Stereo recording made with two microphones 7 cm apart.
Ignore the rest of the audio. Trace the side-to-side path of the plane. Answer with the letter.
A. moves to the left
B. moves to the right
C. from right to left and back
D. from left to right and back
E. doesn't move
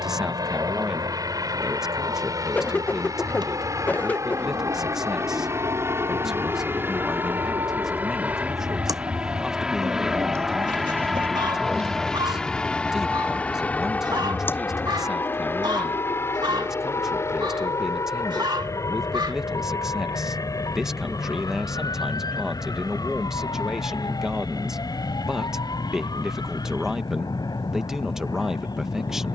A.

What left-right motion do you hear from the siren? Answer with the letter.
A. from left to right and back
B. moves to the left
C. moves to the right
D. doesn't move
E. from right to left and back
B.